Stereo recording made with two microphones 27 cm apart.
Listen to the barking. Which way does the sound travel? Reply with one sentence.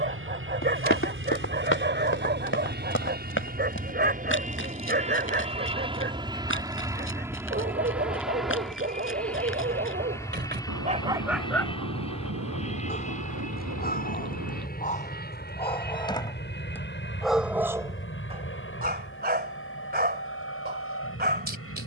In this clip you hear the barking move from right to left and back again.